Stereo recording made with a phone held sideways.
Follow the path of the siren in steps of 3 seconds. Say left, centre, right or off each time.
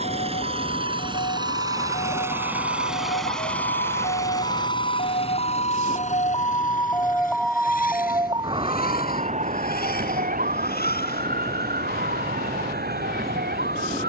left, left, centre, right, right.